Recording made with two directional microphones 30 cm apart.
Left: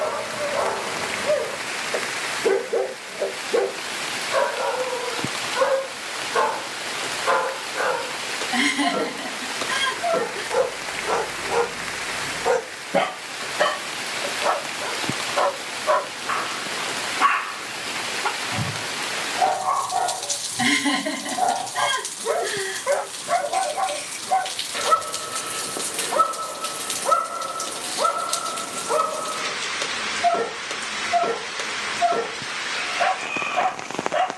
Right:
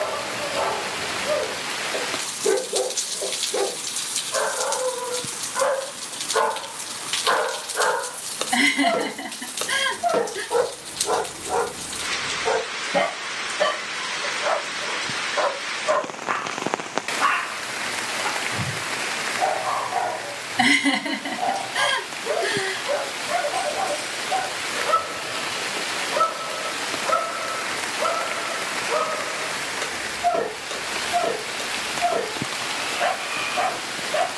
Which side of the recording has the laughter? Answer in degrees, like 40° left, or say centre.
30° right.